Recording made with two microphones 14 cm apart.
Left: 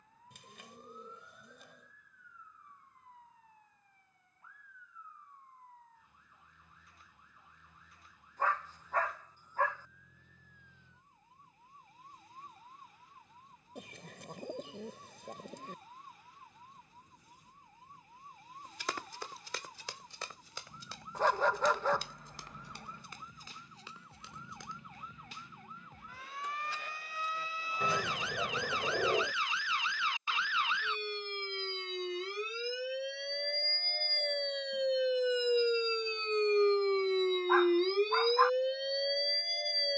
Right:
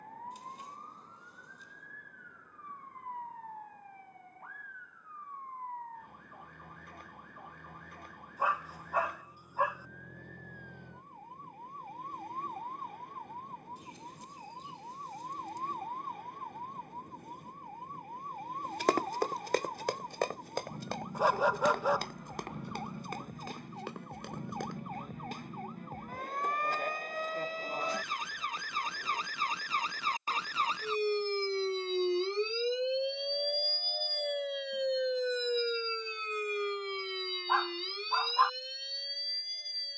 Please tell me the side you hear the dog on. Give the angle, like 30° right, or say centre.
10° right.